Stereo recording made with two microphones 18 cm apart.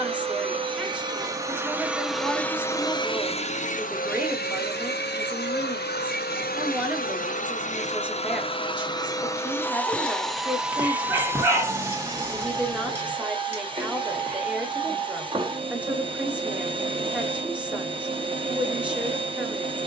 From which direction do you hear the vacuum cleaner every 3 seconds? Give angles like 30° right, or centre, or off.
10° right, 60° left, 50° left, centre, 30° right, 30° right, 30° right.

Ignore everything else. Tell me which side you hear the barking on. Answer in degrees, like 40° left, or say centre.
10° right.